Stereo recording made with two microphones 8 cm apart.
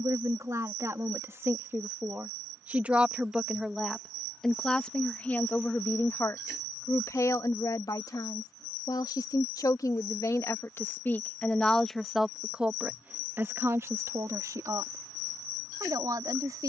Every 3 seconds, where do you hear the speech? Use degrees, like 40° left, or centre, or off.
30° right, 10° left, 50° left, 30° left, 30° right, 50° right.